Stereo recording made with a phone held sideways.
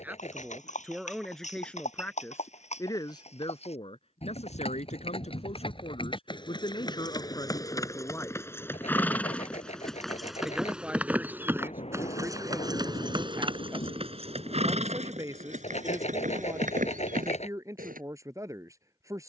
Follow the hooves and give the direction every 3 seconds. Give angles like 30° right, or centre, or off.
50° left, 40° left, 20° left, centre, 30° right, 50° right, off.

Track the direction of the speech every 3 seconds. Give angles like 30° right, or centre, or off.
centre, 40° left, 20° left, 10° right, 20° right, 20° right, 20° right.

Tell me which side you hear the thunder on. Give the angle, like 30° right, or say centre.
40° left.